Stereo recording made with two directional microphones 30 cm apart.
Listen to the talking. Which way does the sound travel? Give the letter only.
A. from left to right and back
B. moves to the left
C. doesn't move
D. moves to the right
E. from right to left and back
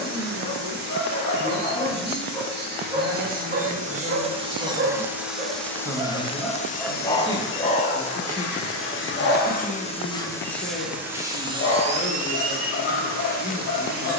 B.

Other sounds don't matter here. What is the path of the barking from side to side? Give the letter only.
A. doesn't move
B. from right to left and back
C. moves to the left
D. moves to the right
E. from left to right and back
E.